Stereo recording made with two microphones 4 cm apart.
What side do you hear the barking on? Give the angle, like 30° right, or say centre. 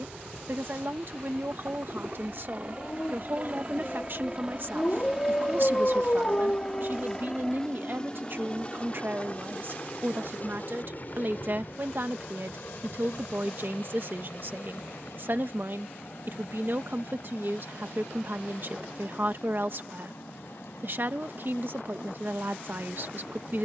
30° left.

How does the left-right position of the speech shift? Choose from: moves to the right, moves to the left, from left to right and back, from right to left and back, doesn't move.
doesn't move.